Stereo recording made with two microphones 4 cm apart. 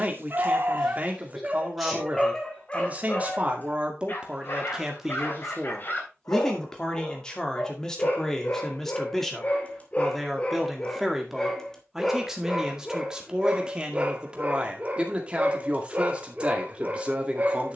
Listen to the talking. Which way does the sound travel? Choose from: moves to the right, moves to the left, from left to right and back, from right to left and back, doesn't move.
from right to left and back.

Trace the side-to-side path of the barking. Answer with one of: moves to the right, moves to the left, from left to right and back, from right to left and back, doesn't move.
from right to left and back.